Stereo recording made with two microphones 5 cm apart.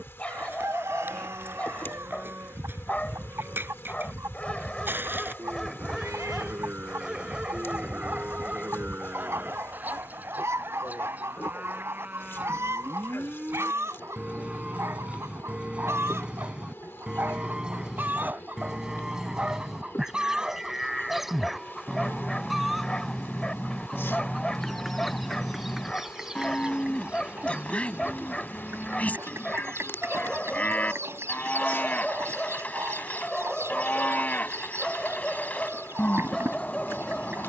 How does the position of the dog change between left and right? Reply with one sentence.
You can hear the dog move from left to right and back again.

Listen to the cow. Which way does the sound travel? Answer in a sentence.
In this clip you hear the cow move from right to left.